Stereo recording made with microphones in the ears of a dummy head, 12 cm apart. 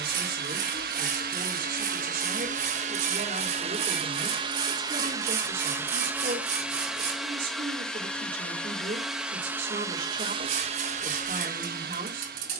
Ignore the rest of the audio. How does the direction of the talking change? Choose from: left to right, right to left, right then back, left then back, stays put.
stays put.